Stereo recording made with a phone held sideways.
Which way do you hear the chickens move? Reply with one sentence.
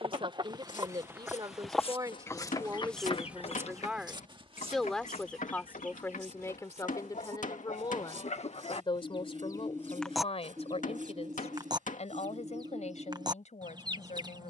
In this clip you hear the chickens move from right to left and back again.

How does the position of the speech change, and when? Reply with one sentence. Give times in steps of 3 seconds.
You can hear the speech on the right from 0 s, in the centre from 3 s and on the left from 6 s.